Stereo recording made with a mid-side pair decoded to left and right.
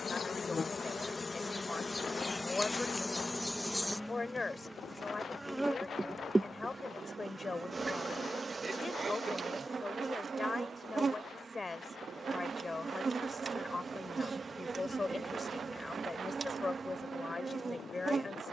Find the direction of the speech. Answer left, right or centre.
left.